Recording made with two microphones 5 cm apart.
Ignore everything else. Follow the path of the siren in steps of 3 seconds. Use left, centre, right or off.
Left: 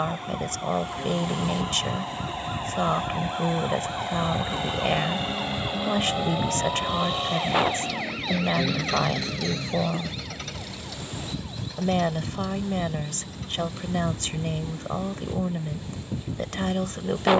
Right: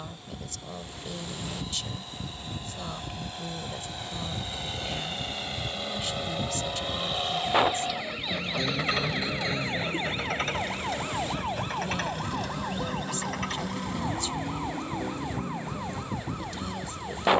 left, left, left, right, right, right.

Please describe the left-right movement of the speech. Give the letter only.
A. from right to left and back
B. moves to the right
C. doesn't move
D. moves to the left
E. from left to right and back
C.